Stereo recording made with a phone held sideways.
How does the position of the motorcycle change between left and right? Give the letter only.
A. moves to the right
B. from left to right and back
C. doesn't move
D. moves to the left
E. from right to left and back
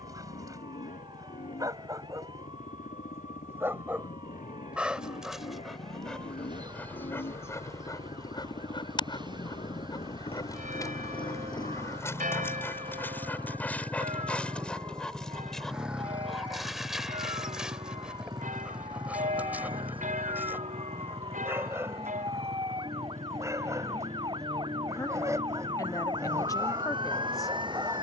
A.